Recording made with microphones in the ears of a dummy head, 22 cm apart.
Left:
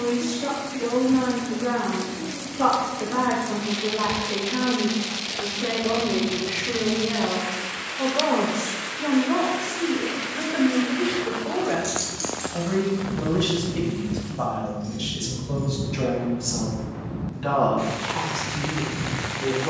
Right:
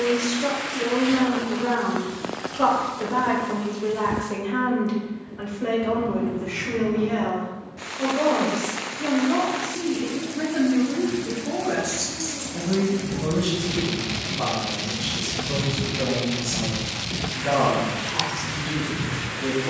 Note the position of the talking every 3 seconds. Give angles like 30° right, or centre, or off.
20° right, 20° right, 10° left, 40° left, 60° left, 70° left, 70° left.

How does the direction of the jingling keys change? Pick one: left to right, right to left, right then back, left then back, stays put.
right then back.